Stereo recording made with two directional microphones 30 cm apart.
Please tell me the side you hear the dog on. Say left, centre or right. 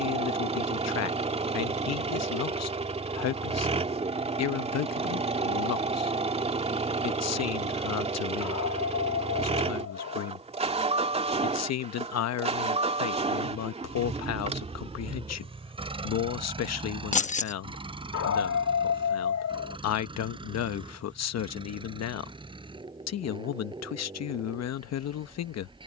left.